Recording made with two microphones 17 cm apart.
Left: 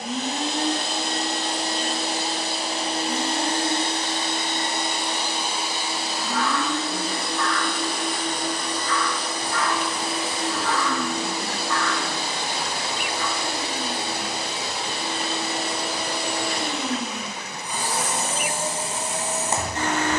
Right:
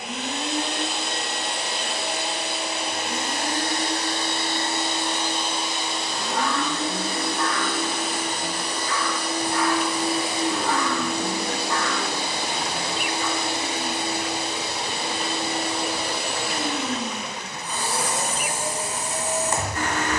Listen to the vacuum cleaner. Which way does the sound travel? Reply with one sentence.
You can hear the vacuum cleaner go right and come back.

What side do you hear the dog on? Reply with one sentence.
In this clip you hear the dog on the right.